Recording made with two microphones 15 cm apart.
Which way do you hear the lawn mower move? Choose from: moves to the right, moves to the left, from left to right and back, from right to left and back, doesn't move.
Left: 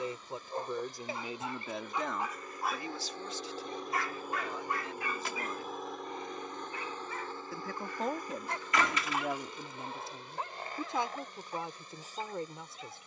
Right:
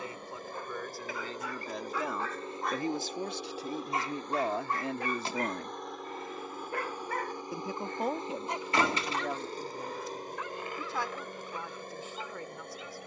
from right to left and back.